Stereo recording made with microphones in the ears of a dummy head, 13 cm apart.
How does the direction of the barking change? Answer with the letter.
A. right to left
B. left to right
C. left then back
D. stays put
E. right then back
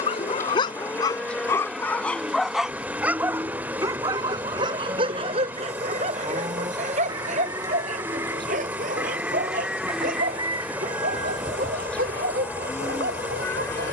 B.